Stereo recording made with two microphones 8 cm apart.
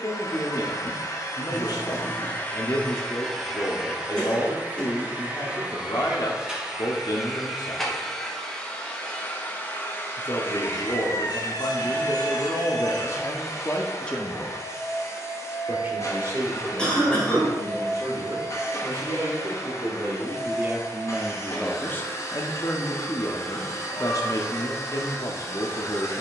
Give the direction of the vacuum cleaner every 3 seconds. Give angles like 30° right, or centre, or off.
40° left, 10° right, centre, 30° left, 40° left, 40° left, 40° left, 40° left, 40° left.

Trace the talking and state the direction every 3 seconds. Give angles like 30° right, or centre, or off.
60° left, 60° left, 60° left, 60° left, 40° left, 40° right, 40° right, 30° left, 50° left.